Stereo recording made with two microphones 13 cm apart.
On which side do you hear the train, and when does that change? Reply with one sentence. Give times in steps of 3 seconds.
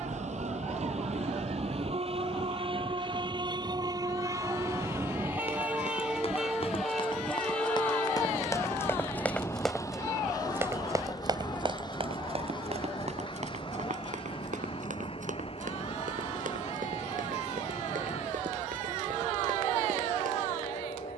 You can hear the train on the right from 0 s, in the centre from 6 s and on the left from 9 s.